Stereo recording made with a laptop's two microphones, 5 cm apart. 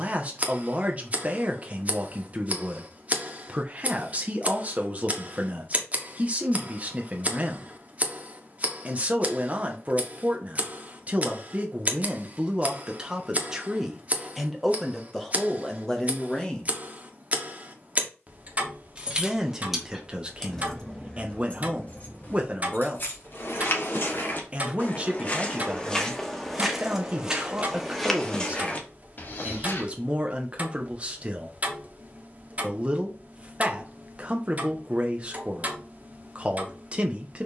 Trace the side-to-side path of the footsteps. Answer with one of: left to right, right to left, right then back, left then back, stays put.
right then back.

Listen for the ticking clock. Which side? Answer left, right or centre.
right.